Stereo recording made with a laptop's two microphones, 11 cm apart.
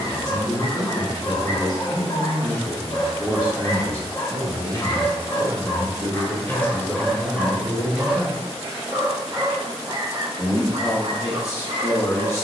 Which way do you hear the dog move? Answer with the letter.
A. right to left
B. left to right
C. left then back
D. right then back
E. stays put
B.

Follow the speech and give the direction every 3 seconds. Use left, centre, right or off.
left, right, centre, left.